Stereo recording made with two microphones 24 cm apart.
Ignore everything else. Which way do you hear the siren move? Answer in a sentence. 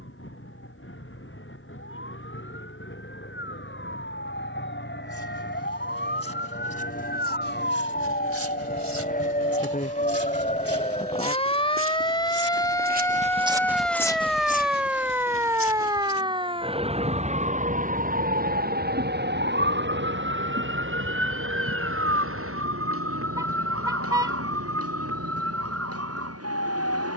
In this clip you hear the siren move to the right.